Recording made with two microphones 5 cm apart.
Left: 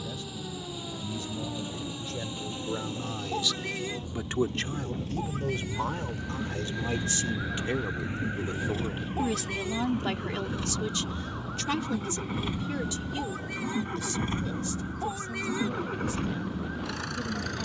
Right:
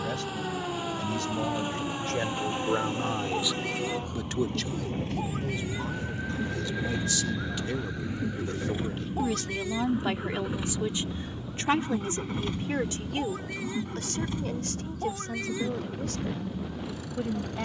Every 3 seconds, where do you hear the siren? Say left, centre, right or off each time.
right, right, centre, left, left, left.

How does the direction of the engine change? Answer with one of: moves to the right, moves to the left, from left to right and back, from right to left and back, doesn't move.
moves to the left.